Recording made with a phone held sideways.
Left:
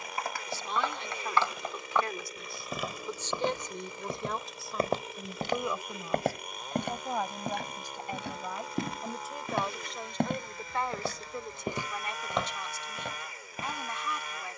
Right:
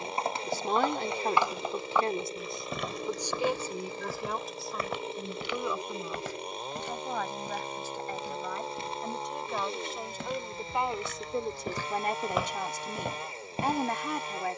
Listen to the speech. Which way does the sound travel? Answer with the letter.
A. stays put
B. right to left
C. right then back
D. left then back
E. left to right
D.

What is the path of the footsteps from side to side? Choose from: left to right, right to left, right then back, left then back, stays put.
left then back.